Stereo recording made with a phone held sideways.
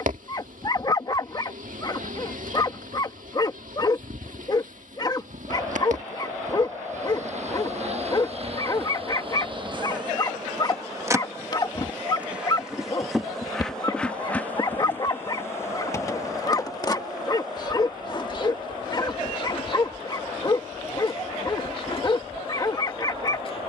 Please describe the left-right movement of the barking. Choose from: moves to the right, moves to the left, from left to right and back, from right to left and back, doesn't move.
doesn't move.